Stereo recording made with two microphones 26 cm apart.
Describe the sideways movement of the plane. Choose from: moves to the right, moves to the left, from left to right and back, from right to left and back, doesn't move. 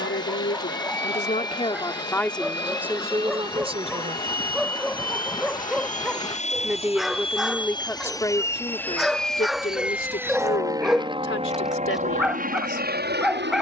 moves to the right.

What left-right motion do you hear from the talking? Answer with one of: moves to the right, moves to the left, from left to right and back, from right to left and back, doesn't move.
from left to right and back.